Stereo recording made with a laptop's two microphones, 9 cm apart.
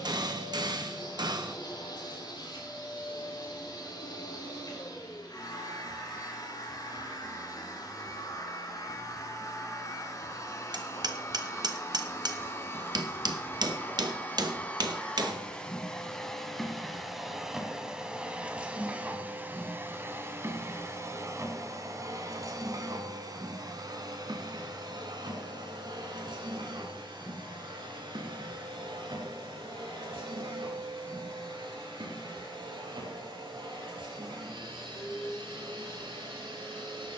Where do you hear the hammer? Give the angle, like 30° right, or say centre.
60° right.